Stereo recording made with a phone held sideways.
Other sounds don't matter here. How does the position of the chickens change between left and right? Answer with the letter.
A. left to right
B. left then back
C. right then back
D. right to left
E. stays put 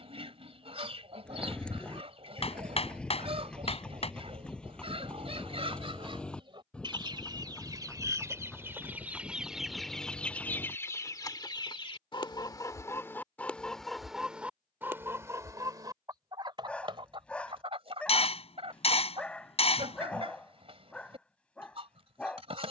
B.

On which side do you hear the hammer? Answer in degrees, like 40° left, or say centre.
40° left.